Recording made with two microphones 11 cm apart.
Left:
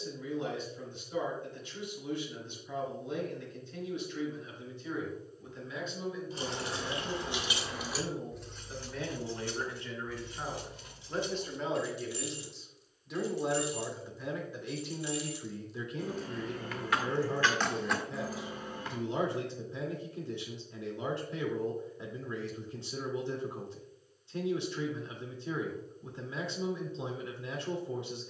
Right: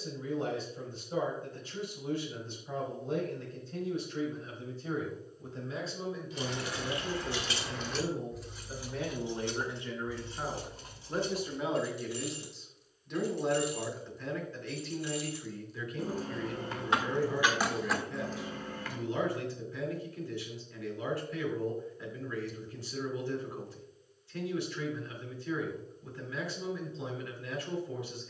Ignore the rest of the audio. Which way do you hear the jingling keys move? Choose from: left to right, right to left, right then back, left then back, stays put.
right then back.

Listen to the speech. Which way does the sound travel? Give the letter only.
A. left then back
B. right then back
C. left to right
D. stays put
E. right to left
E.